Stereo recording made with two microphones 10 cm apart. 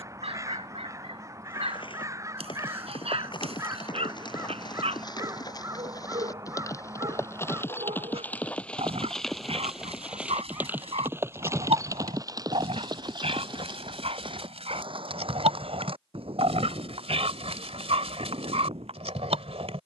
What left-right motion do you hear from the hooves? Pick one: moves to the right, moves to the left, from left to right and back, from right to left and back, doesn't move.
moves to the right.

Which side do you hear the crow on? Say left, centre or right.
right.